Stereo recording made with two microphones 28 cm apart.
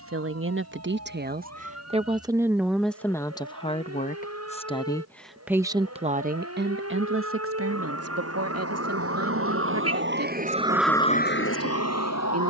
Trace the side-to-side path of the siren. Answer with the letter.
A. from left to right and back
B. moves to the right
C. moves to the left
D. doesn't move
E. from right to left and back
C.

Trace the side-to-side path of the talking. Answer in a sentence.
In this clip you hear the talking go left and come back.